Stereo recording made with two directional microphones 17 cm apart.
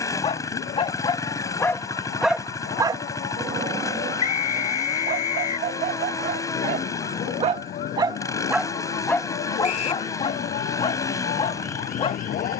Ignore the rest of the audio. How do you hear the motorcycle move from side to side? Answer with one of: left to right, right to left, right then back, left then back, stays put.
stays put.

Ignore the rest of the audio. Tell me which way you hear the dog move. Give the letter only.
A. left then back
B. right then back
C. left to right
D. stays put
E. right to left
B.